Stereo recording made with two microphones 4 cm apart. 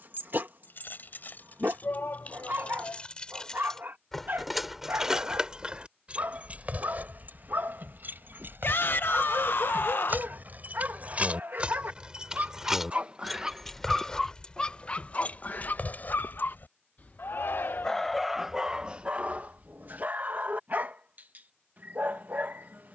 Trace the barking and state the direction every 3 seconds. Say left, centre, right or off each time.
right, right, right, right, centre, left, right, right.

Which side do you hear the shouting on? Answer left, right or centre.
left.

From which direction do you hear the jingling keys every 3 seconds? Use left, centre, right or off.
left, centre, right, right, centre, left, off, off.